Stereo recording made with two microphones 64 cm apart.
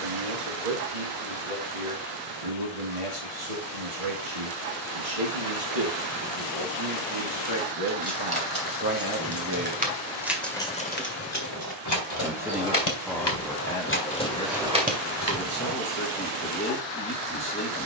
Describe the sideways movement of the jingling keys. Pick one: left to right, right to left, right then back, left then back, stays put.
left then back.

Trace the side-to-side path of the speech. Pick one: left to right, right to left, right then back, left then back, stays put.
right to left.